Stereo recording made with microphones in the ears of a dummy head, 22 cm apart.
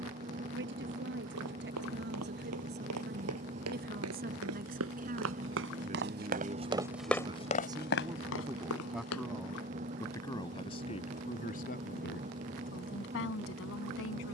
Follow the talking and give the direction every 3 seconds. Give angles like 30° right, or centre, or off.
50° right, 40° right, 20° right, 20° left, 50° left.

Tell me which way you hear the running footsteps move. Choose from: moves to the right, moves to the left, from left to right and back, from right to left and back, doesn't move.
moves to the left.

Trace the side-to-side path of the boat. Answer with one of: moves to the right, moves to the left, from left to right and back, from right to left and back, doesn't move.
doesn't move.